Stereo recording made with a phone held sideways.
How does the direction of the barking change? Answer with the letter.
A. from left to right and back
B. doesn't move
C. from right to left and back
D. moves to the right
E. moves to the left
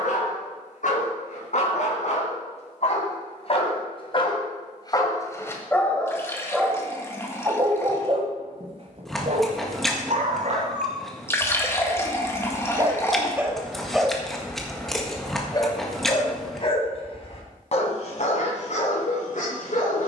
A.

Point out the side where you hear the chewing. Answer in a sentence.
You can hear the chewing in the centre.